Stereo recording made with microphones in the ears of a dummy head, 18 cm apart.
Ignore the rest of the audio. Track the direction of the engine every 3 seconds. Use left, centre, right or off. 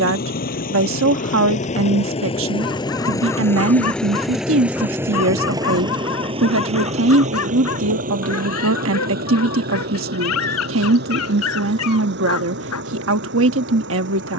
left, centre, right, right, right.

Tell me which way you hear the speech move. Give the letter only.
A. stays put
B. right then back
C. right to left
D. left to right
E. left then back
A.